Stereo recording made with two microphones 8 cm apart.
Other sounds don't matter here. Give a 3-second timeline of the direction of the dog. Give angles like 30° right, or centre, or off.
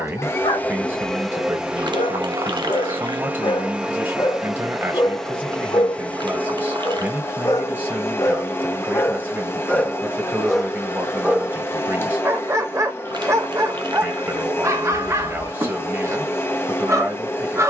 70° left, 60° left, 40° left, centre, 30° right, 30° right.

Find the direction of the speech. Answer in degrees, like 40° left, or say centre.
20° right.